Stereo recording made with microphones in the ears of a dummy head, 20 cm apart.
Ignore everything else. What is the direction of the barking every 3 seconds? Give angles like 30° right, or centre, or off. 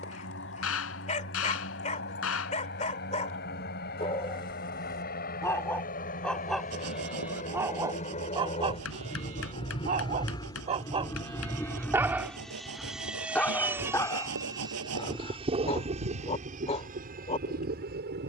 30° left, 20° left, 10° right, 30° right, 10° left, 30° left.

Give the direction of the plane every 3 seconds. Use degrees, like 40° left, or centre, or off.
50° left, 50° left, 40° left, 20° left, 10° right, 30° right.